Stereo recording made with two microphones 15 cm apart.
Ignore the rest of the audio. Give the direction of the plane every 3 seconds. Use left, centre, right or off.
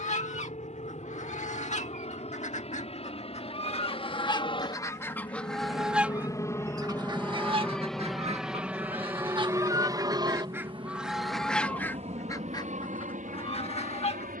left, left, centre, right, right.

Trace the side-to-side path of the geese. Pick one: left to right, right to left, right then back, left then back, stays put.
right then back.